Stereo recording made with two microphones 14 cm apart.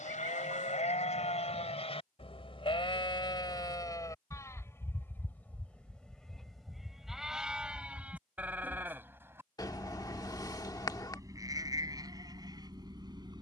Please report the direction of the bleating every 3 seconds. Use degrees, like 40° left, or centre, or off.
50° left, 20° left, centre, 20° right, 30° right.